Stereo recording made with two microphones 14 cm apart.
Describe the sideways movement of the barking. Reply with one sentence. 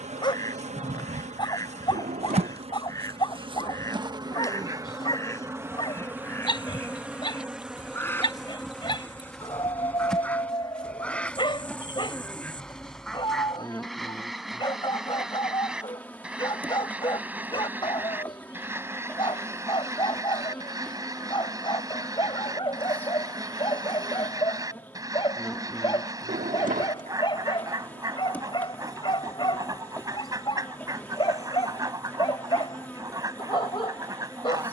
You can hear the barking stay in one place.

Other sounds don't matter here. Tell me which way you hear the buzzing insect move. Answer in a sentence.
You can hear the buzzing insect travel towards the left.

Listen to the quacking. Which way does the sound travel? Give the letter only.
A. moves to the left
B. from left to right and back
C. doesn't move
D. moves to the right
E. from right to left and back
D.